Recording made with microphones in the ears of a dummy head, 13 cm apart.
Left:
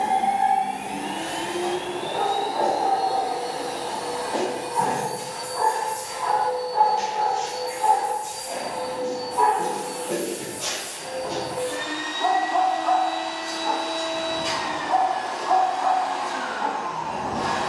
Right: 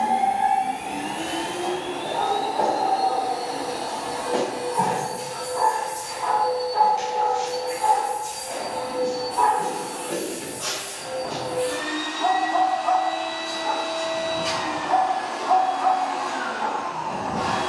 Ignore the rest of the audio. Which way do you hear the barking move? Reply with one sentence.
You can hear the barking move from right to left and back again.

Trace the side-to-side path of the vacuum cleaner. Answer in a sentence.
You can hear the vacuum cleaner stay in one place.